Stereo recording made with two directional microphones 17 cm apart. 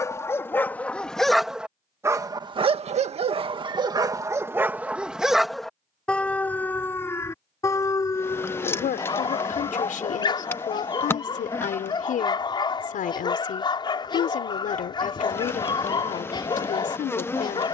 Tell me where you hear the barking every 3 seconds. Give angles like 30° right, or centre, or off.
centre, 20° right, 20° left, 30° left, 30° left, 30° left.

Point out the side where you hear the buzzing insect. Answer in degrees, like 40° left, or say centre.
10° left.